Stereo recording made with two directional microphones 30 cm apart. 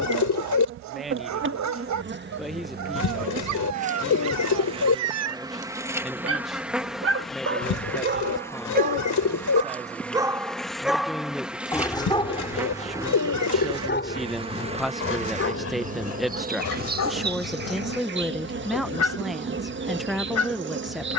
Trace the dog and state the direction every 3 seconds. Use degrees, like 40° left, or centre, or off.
60° right, 60° right, 40° right, 10° right, 30° left, 50° left, 60° left.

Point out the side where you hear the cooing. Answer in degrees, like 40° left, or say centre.
70° left.